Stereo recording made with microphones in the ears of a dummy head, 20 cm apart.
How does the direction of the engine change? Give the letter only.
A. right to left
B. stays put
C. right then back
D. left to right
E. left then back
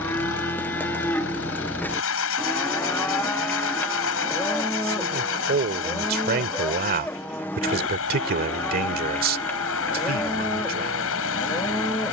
B.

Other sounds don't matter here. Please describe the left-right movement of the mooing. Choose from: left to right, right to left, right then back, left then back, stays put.
stays put.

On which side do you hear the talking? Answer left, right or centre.
right.